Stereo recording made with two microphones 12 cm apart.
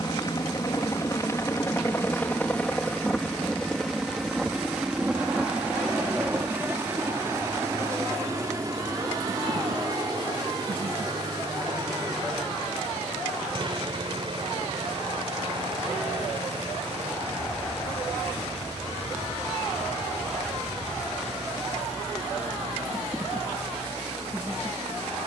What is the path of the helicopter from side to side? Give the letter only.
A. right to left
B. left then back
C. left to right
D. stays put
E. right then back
C.